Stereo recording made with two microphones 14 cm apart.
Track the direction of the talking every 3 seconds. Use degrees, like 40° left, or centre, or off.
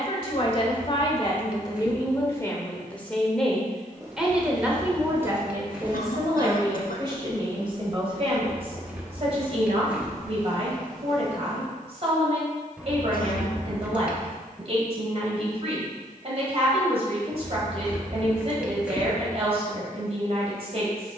30° left, 10° right, 30° right, 40° right, 40° right, 40° right, 40° right.